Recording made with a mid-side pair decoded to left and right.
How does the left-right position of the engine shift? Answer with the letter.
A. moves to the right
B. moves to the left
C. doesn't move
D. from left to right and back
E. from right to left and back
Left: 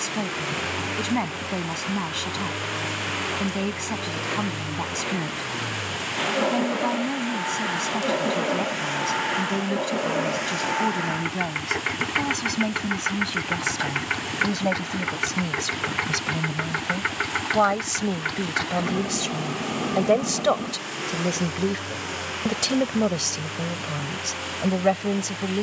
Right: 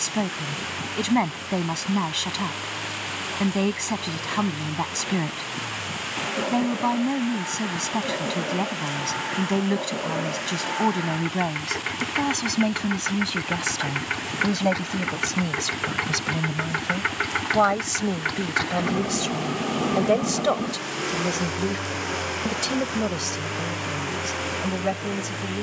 A.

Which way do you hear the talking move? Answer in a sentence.
In this clip you hear the talking move from right to left.